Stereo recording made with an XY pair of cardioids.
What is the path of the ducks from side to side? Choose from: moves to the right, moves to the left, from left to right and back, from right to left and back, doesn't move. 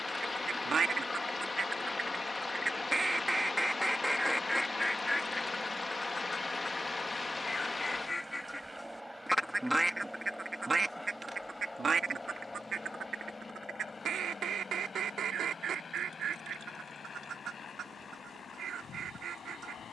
from right to left and back.